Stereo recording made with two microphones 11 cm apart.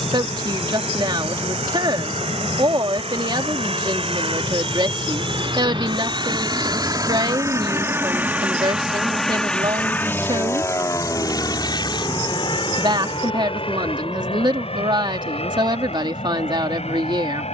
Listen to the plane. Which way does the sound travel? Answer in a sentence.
You can hear the plane travel towards the left.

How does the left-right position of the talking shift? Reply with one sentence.
You can hear the talking stay in one place.